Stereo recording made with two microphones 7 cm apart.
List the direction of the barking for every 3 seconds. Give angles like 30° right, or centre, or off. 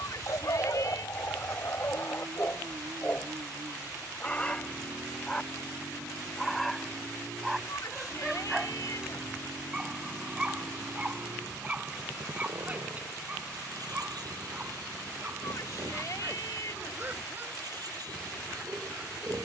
40° left, 20° left, centre, 20° right, 20° right, 30° right, 30° right.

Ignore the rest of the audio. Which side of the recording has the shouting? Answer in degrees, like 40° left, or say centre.
60° left.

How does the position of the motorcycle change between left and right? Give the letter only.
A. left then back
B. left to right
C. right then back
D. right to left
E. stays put
E.